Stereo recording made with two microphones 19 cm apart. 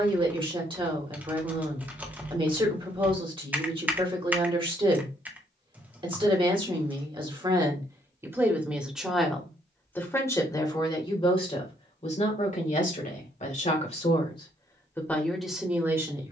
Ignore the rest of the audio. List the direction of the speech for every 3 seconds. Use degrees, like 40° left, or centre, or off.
30° right, 30° right, 20° right, 20° left, 40° left, 10° right.